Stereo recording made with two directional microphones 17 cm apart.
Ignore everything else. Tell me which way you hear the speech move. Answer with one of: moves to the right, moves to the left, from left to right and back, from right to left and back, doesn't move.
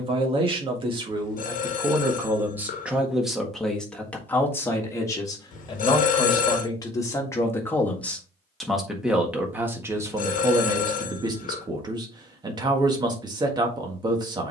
from right to left and back.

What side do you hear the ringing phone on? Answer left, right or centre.
left.